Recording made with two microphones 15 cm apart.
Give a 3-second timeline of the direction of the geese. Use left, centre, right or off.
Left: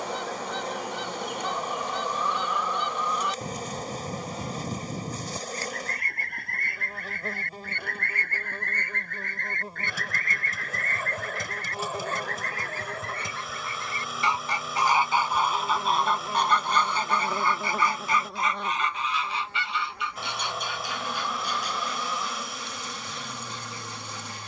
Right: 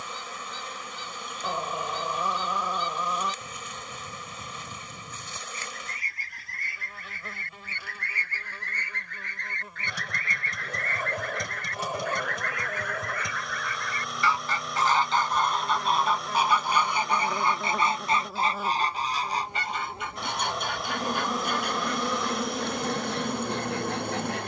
left, left, left, left, left, centre, right, right.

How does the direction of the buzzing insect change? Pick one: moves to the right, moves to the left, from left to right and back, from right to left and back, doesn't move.
moves to the right.